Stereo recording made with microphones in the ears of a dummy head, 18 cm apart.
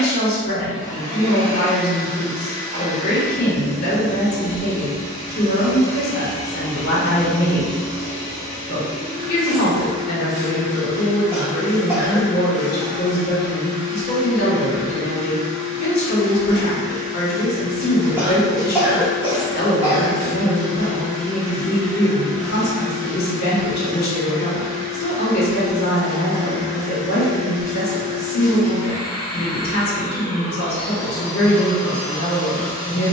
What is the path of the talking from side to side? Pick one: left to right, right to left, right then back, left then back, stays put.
stays put.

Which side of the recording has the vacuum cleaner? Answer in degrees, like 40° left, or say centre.
20° right.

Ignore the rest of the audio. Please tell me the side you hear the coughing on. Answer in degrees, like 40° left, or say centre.
10° right.